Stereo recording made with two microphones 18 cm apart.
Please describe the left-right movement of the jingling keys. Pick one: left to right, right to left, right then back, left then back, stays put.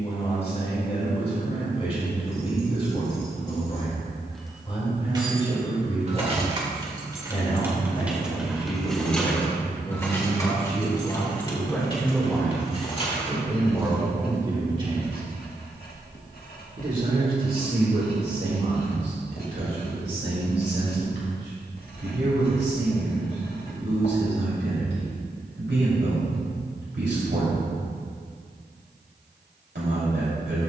right then back.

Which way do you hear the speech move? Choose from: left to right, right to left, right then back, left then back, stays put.
left to right.